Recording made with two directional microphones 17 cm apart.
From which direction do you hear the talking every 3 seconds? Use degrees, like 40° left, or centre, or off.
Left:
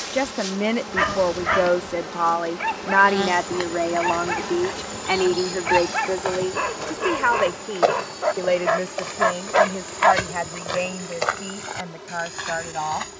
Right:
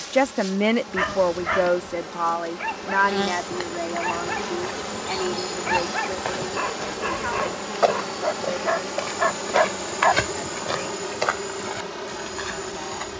centre, 40° left, 60° left, 60° left, 70° left.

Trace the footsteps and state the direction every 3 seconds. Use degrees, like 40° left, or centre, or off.
off, 10° left, centre, 10° right, 10° left.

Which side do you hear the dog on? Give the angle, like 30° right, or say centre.
10° left.